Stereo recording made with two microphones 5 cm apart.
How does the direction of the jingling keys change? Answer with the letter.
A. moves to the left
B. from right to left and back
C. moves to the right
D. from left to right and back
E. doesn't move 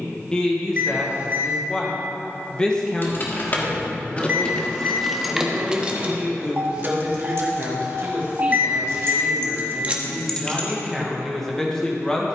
D.